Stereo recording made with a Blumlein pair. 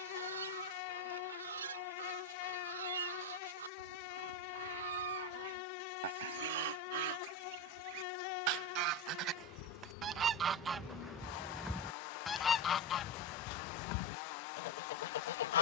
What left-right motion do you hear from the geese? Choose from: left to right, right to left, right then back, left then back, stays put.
right to left.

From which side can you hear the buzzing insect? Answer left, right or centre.
left.